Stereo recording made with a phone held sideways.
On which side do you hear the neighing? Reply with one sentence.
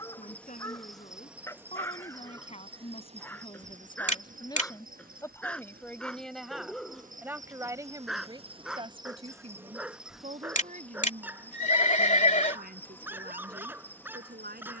You can hear the neighing on the left.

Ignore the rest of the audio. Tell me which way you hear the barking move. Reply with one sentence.
You can hear the barking move to the right.